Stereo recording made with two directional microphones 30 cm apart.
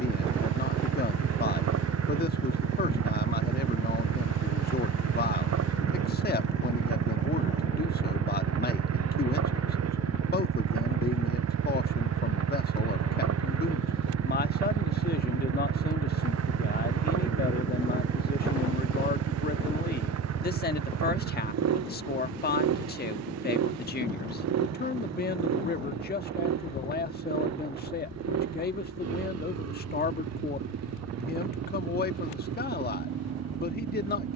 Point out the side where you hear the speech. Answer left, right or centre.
left.